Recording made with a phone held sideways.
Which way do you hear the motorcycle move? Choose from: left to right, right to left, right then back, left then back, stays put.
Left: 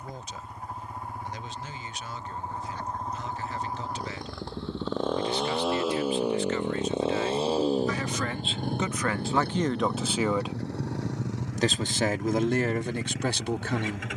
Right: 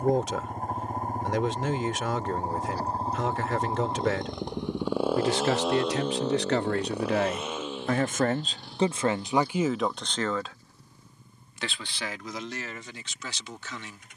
right to left.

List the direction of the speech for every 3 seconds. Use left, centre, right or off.
right, right, right, centre, left.